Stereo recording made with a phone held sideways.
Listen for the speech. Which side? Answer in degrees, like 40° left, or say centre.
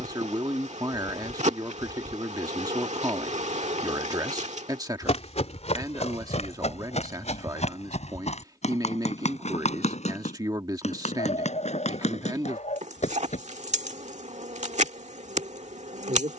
20° right.